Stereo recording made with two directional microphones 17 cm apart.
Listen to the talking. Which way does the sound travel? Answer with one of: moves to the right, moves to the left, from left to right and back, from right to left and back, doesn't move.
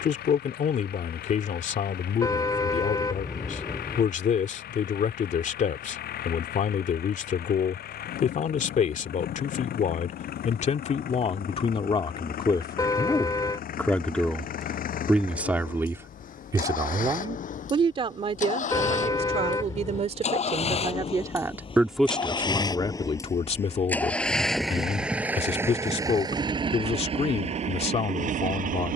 from left to right and back.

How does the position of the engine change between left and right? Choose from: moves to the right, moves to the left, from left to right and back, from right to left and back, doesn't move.
moves to the right.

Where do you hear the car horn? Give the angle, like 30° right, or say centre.
20° left.